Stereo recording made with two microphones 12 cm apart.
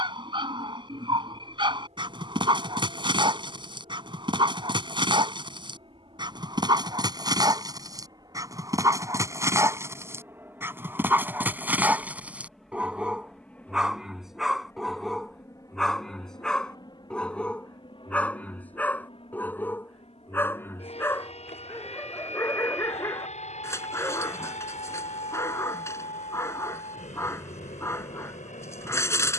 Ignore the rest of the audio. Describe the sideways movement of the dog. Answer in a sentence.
In this clip you hear the dog move to the left.